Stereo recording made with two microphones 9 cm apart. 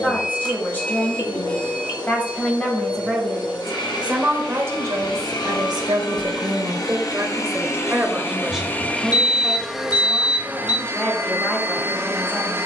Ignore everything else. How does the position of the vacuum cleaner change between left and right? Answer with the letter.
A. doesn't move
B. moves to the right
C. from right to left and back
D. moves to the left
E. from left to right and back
B.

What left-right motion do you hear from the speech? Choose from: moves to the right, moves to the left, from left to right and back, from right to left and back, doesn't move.
from left to right and back.